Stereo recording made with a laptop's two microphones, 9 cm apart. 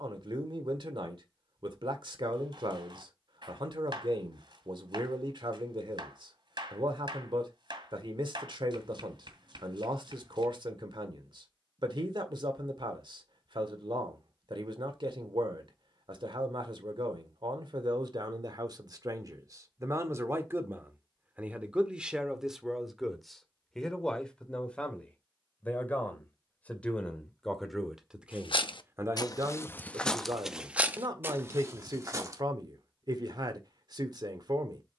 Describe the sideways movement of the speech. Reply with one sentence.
In this clip you hear the speech go left and come back.